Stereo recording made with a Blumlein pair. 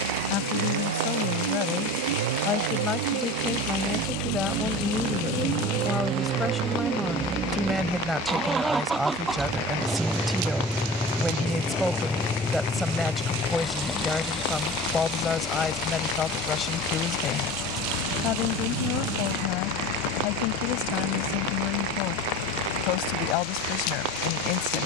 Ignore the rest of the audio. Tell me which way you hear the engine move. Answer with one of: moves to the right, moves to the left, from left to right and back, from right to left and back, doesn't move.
moves to the left.